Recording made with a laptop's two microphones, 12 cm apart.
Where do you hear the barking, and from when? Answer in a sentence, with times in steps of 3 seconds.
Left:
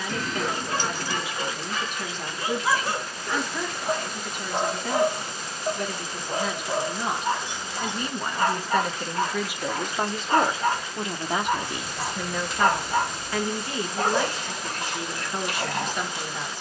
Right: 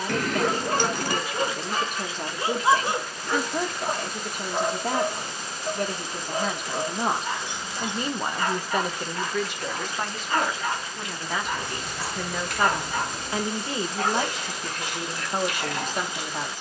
You can hear the barking on the right from 0 s, in the centre from 3 s and on the left from 6 s.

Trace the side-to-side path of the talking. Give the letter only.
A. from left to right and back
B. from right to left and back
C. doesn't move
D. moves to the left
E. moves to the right
B.